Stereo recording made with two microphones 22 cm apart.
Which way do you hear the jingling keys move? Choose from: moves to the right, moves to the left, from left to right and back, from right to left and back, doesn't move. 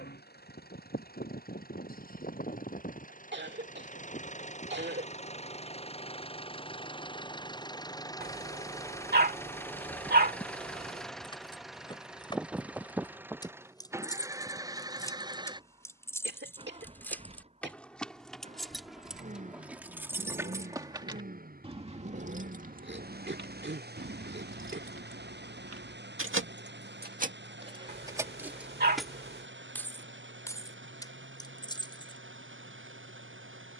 from left to right and back.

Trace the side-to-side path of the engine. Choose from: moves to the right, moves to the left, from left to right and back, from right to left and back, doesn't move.
moves to the right.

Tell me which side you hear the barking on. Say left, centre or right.
right.